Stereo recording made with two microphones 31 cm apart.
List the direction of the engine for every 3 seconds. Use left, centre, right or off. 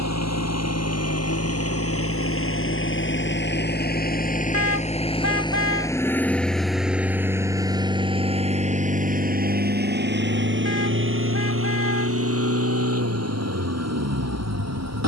left, left, centre, right, right.